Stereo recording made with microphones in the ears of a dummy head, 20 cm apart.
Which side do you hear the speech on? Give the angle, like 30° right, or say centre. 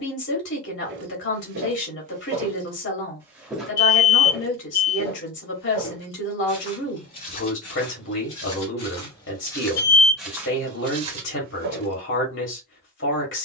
60° left.